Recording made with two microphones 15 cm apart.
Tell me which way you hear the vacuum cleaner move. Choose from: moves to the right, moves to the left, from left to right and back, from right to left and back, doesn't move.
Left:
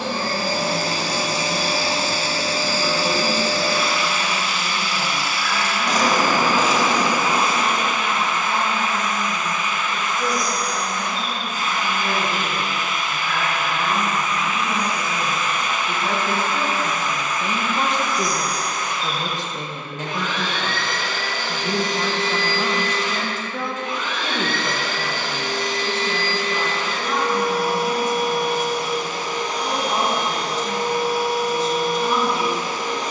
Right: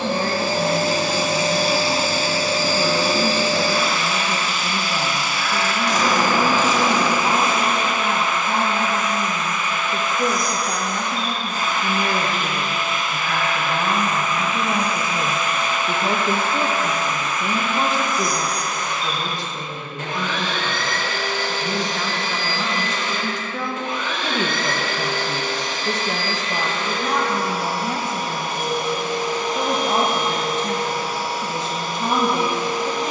doesn't move.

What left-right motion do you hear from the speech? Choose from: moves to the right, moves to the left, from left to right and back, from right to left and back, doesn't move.
from right to left and back.